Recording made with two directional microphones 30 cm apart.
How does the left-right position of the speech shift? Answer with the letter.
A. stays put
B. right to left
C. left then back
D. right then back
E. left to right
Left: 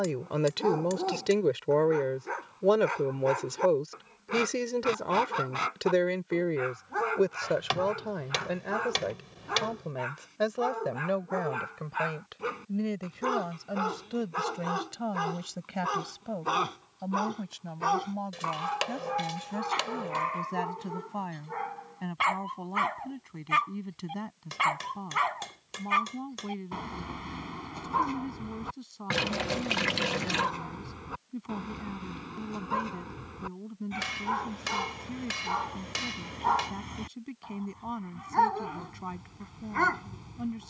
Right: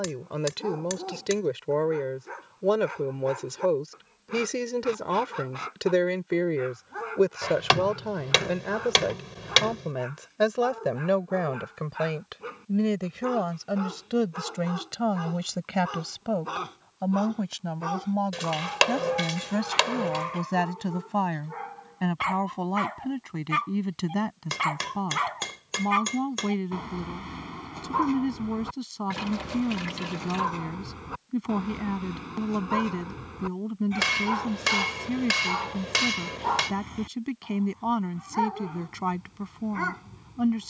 E.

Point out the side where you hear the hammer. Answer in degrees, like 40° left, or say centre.
60° right.